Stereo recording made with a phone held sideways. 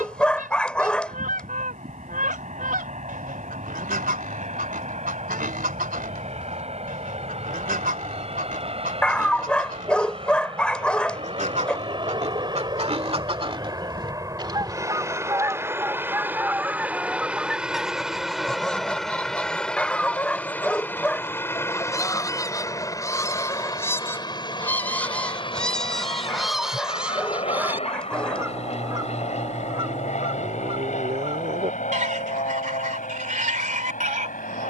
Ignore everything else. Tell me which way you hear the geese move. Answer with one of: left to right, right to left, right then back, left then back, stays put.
left then back.